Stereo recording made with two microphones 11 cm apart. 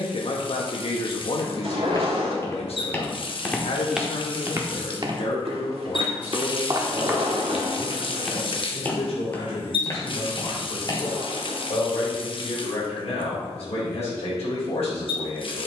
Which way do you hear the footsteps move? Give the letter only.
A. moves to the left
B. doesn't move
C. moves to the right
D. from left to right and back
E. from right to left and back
D.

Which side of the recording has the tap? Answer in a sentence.
You can hear the tap on the left.